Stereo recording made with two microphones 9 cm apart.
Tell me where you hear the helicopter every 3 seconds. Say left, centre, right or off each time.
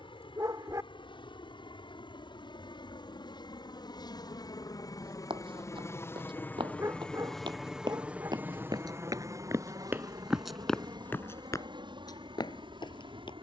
left, left, centre, right, right.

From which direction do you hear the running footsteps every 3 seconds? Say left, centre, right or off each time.
off, right, right, centre, left.